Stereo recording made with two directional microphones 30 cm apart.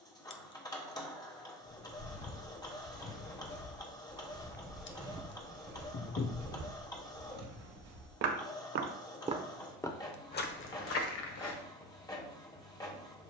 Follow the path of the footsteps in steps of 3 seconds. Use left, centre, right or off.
left, centre, right, left, off.